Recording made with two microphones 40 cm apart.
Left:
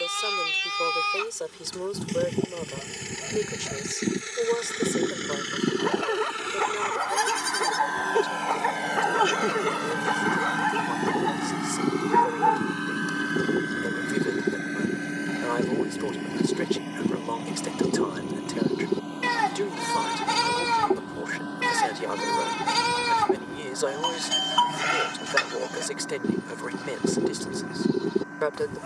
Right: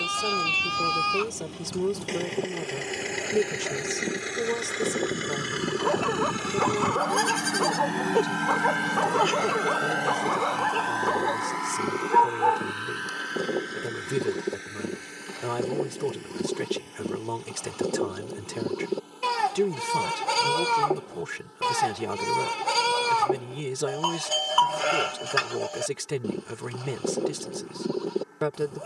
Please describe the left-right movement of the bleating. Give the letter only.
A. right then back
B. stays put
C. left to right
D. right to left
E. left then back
B.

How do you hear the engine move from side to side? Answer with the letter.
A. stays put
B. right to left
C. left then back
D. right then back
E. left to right
B.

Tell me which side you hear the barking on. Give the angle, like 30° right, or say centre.
40° left.